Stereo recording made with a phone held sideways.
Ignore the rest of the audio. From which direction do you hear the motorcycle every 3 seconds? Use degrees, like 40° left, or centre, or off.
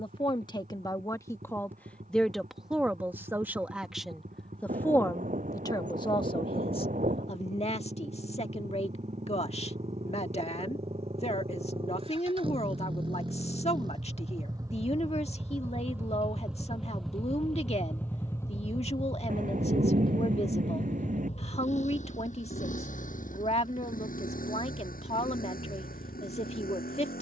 60° right, 60° right, 50° right, 40° right, 30° right, centre, 30° left, 60° left, 70° left.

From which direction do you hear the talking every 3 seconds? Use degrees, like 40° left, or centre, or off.
20° left, centre, 40° left, 40° left, 40° left, 40° left, 40° left, 40° left, 40° left.